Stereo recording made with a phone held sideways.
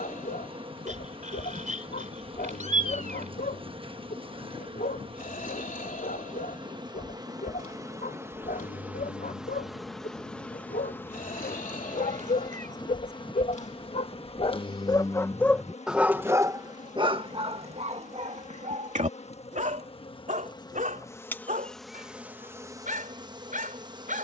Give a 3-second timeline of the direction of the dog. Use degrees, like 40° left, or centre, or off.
80° left, 80° left, 80° left, 80° left, 60° left, 20° right, 60° right, 70° right.